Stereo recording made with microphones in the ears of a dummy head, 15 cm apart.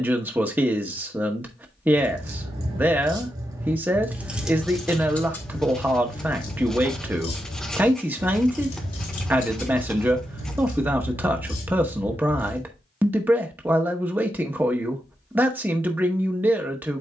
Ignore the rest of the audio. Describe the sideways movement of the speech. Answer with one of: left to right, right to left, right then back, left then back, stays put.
stays put.